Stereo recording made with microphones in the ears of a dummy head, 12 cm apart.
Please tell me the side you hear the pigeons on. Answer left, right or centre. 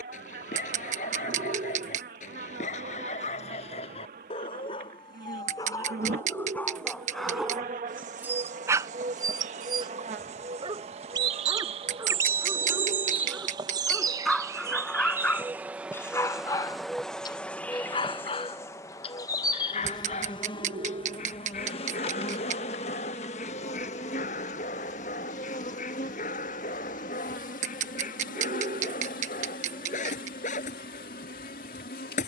right.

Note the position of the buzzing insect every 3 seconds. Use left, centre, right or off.
right, right, right, right, right, centre, left, left, left, left, left.